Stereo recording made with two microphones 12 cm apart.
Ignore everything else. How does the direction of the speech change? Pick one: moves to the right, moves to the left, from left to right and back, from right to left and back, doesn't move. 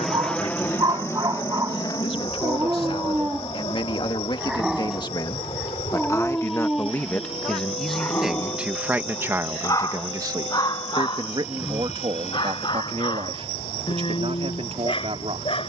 moves to the right.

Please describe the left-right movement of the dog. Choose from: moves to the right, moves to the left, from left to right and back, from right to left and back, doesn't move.
moves to the left.